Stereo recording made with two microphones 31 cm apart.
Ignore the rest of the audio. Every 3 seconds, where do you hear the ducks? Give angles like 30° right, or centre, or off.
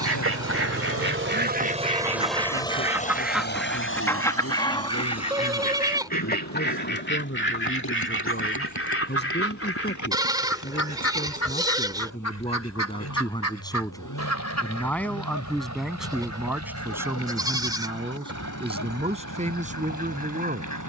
30° right, 10° left, 40° left, 50° left, 60° left, 60° left, 60° left.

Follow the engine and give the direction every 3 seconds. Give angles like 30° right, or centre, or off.
30° right, 50° left, 60° left, 70° left, 70° left, 70° left, 70° left.